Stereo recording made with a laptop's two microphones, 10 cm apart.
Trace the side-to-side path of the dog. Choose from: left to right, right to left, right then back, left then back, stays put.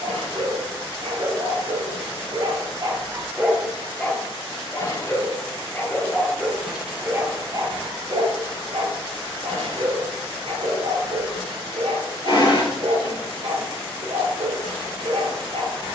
left then back.